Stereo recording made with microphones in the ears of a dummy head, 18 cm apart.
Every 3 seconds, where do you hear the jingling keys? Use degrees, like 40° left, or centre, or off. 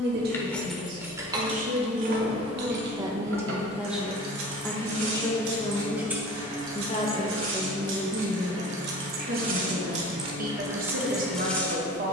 20° right, 70° right, 70° right, 20° right.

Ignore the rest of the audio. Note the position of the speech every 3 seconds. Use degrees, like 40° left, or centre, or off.
40° right, centre, centre, 40° right.